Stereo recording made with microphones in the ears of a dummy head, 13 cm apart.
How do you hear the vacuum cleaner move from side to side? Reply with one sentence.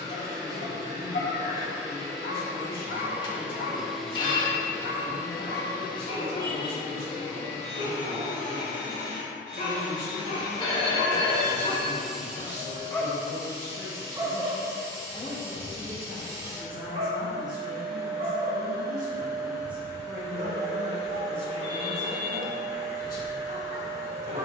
In this clip you hear the vacuum cleaner move from right to left and back again.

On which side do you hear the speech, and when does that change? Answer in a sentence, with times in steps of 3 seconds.
In this clip you hear the speech on the left from 0 s, in the centre from 15 s and on the left from 21 s.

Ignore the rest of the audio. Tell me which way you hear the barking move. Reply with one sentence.
You can hear the barking go from the left side to the right.